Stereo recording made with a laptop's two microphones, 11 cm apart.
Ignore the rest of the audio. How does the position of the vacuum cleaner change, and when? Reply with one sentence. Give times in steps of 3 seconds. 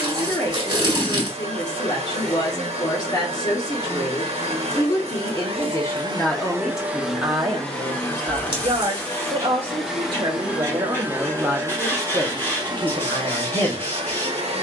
You can hear the vacuum cleaner on the right from 0 s, in the centre from 6 s and on the right from 12 s.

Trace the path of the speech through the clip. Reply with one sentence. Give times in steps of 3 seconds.
You can hear the speech on the left from 0 s, on the right from 6 s and on the left from 12 s.